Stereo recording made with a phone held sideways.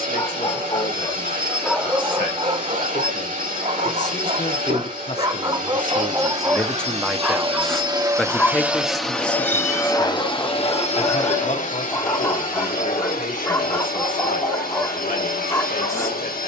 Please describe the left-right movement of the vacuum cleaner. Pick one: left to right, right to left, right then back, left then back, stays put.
right to left.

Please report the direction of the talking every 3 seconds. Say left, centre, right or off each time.
left, left, centre, left, left, left.